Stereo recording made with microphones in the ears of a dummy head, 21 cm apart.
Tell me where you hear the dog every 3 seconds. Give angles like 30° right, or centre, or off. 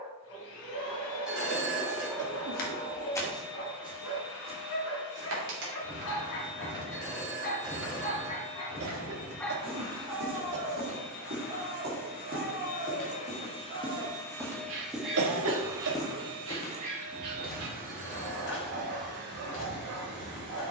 80° left, 70° left, 40° left, 20° right, 40° right, 60° right, 60° right.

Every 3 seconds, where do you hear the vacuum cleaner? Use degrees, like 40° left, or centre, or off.
70° left, 70° left, 70° left, 60° left, 30° left, 30° right, 50° right.